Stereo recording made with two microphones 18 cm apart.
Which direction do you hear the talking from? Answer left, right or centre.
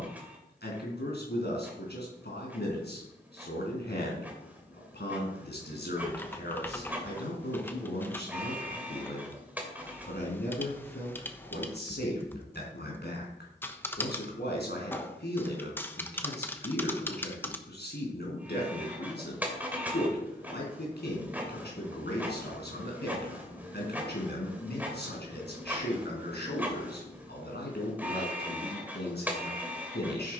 left.